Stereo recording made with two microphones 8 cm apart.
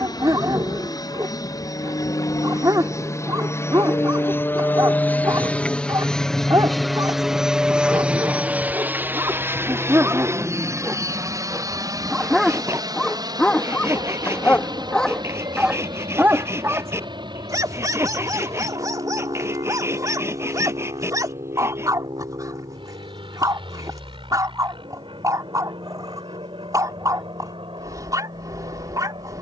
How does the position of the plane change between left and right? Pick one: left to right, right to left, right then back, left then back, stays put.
left to right.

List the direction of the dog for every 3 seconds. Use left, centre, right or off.
right, right, right, right, centre, right, right, right, right, right.